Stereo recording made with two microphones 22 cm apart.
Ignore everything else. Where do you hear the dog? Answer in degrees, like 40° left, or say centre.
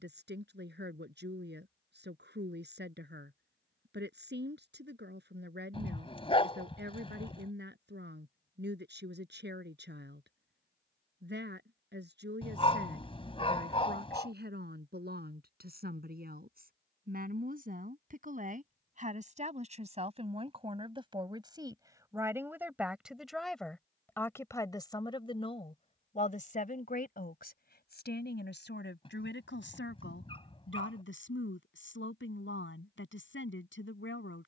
30° left.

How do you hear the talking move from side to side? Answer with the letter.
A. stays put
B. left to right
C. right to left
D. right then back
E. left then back
C.